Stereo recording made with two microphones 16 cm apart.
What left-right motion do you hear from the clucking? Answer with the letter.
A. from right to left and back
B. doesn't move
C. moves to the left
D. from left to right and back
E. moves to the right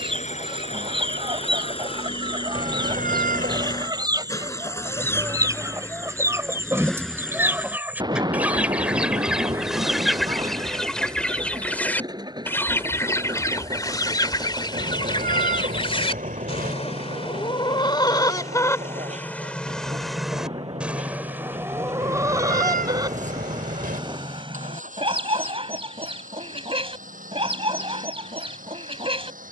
A.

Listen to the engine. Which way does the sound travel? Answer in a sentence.
You can hear the engine move from left to right.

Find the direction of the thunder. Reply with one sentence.
You can hear the thunder on the right.